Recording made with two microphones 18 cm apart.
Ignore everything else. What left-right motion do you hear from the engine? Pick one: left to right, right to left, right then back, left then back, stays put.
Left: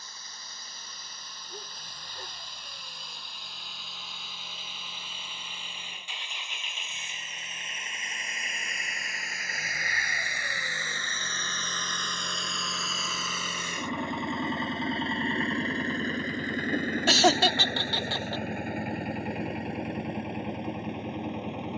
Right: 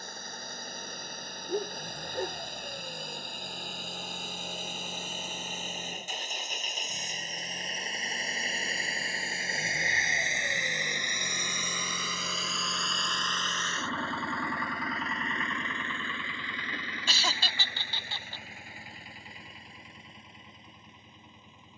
right to left.